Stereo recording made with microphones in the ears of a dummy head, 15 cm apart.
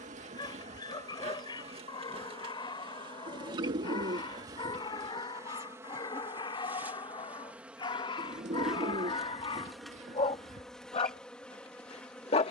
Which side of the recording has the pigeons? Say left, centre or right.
right.